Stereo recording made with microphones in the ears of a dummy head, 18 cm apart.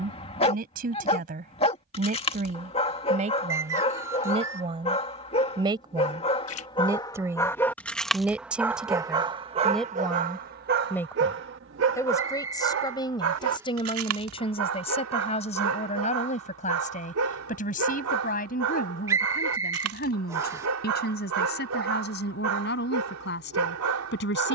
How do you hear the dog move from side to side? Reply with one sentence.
You can hear the dog go from the left side to the right.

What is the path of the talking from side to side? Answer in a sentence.
You can hear the talking move to the left.